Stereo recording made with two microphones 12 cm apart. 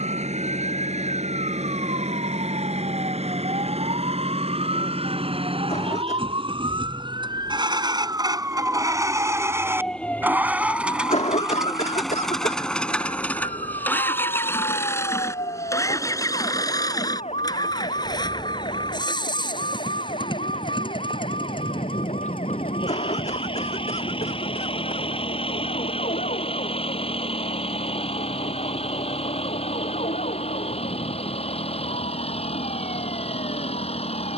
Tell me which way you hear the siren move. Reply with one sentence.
You can hear the siren move to the left.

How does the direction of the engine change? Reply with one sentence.
In this clip you hear the engine move to the left.